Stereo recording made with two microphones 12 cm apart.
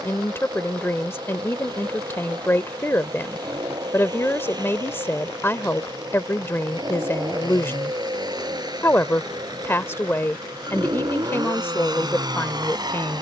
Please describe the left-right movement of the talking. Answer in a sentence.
In this clip you hear the talking stay in one place.